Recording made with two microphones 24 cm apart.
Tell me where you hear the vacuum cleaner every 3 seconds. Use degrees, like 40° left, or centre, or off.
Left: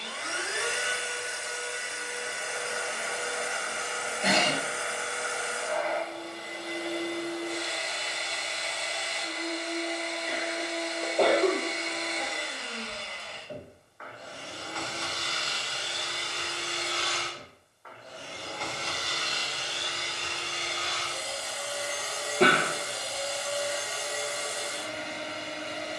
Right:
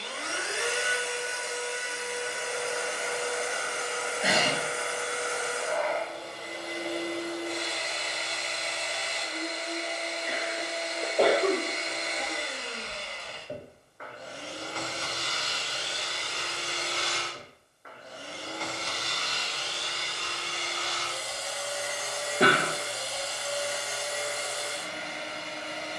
30° right, 30° right, 30° right, 30° right, 30° right, 30° right, 10° left, 40° left, 40° left.